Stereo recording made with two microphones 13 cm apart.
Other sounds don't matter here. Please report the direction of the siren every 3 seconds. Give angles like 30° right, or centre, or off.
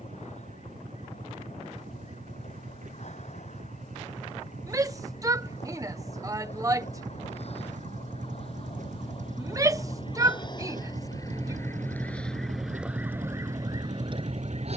60° left, 60° left, 50° left, 30° left, 20° right.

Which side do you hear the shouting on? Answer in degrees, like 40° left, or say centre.
30° right.